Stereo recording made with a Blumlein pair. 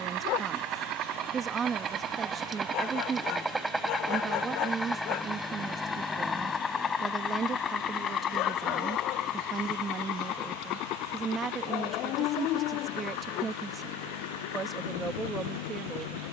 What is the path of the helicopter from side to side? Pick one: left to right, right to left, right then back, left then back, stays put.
right to left.